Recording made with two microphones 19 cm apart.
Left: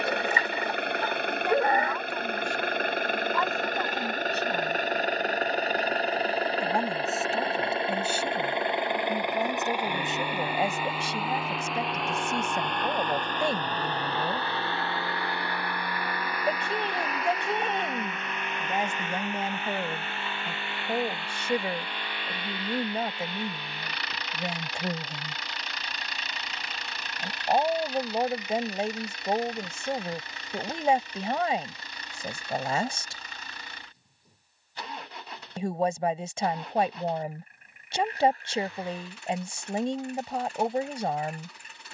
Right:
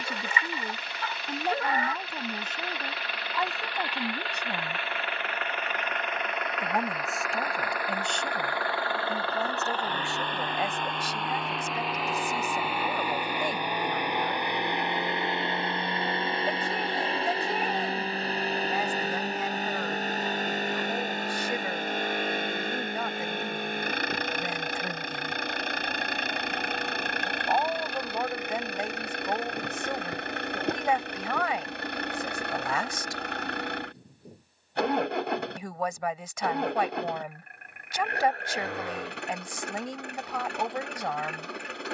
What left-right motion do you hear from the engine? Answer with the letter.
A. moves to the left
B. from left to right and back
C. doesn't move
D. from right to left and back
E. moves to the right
E.